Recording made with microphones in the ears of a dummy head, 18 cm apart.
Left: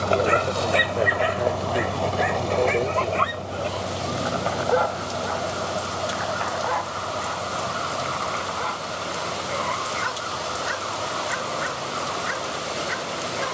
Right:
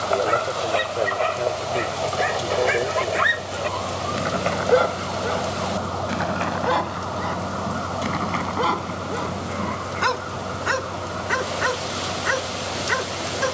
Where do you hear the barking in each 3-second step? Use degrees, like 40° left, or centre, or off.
10° left, 30° right, 60° right, 70° right, 70° right.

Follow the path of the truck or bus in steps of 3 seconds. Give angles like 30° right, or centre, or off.
50° left, 10° right, 30° right, 40° right, 50° right.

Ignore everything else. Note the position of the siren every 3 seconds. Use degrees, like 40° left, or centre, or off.
20° right, 20° left, 40° left, 50° left, 50° left.